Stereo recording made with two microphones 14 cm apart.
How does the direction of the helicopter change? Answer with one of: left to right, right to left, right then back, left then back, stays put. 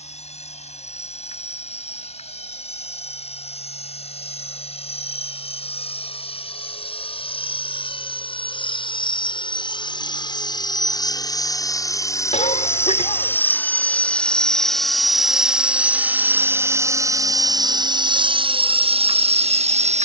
left to right.